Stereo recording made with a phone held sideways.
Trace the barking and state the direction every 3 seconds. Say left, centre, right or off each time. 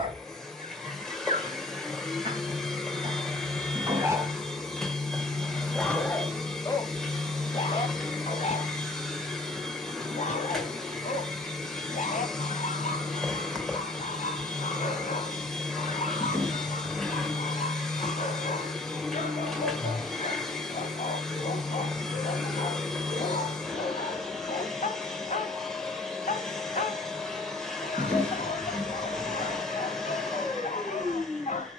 right, centre, left, left, left, left, left, left, left, left, left.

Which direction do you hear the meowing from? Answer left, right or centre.
centre.